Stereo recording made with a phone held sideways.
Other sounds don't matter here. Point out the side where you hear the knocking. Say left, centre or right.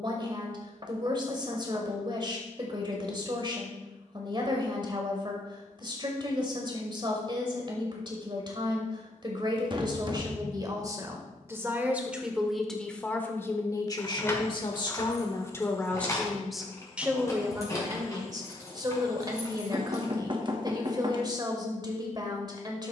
right.